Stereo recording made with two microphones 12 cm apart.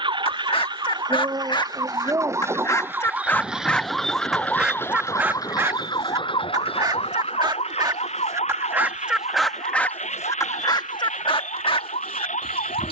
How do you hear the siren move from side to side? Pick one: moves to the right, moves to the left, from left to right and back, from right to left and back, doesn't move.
moves to the left.